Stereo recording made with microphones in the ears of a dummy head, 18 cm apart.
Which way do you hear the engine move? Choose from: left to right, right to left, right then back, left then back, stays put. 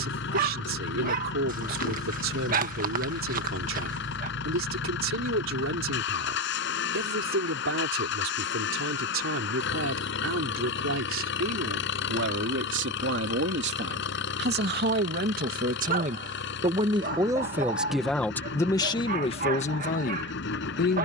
stays put.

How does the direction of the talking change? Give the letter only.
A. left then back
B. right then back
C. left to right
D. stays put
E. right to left
E.